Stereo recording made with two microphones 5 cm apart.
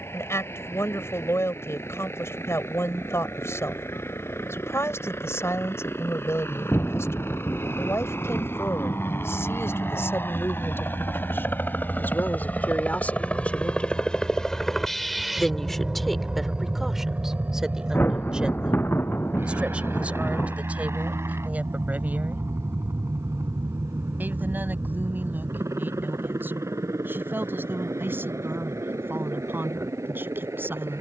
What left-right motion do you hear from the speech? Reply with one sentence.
In this clip you hear the speech go from the left side to the right.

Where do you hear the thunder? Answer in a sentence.
You can hear the thunder on the left.